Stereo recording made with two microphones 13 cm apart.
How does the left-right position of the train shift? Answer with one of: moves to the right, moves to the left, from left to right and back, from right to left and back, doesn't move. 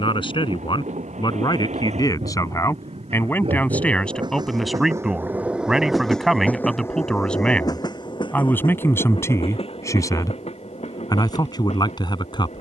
moves to the left.